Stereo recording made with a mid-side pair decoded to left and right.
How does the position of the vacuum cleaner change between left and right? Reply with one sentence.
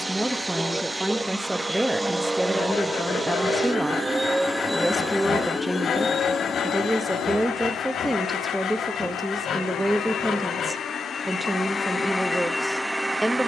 You can hear the vacuum cleaner go left and come back.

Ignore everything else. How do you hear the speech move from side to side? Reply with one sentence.
You can hear the speech stay put.